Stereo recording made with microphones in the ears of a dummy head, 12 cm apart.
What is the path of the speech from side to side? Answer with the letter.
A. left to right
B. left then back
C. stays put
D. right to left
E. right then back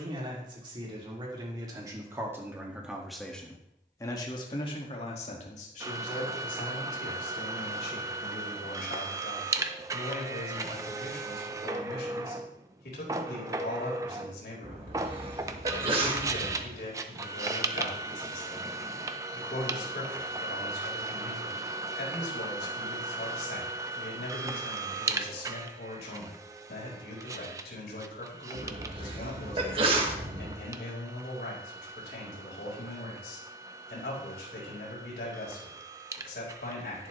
D.